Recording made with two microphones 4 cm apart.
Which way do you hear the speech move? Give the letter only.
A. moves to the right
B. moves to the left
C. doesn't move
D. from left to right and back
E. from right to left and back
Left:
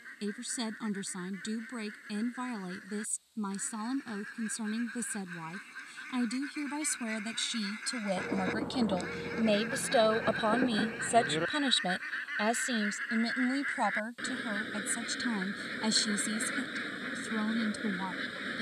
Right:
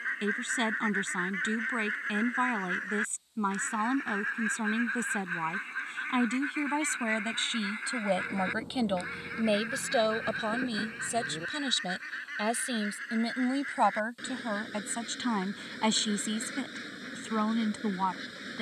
E.